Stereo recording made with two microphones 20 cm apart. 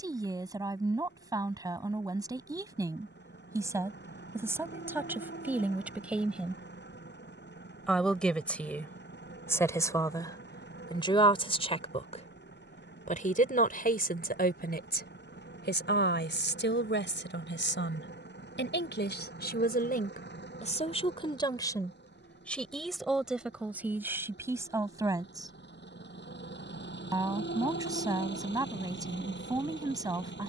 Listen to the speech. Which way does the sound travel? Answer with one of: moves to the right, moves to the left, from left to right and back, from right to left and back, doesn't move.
from right to left and back.